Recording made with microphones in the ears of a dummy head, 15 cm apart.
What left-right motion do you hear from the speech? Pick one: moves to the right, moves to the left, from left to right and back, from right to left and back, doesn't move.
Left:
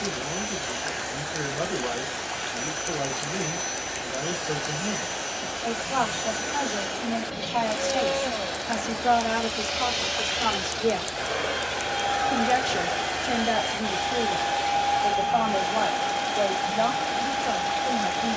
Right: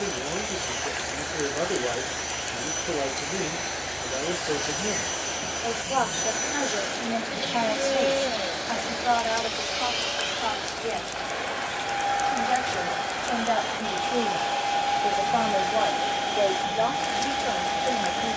from right to left and back.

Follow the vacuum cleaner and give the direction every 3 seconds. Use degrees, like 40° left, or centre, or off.
20° right, 20° right, 20° right, 20° left, 20° left, 10° right.